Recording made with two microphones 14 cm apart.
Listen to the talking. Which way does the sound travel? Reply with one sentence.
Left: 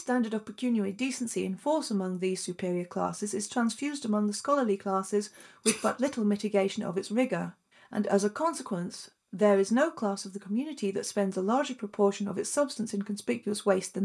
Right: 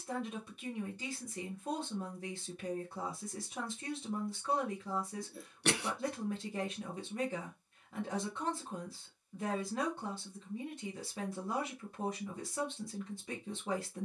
You can hear the talking stay in one place.